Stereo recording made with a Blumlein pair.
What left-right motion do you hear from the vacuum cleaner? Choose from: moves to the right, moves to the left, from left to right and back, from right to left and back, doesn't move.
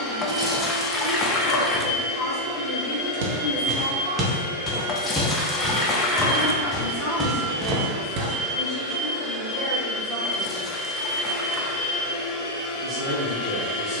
from left to right and back.